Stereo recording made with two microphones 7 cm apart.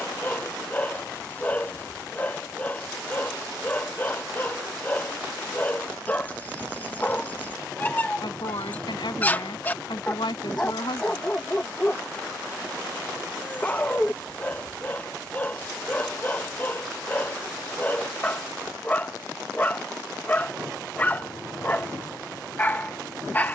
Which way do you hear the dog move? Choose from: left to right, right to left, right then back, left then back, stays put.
stays put.